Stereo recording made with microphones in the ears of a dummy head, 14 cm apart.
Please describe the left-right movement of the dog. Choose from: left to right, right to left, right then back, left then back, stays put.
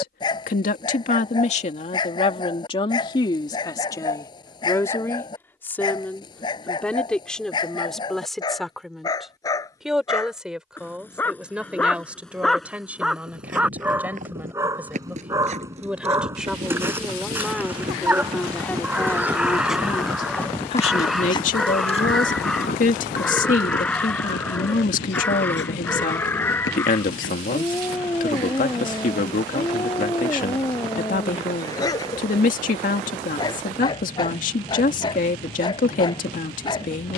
right then back.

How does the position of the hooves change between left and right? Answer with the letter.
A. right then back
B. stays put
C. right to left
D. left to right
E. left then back
C.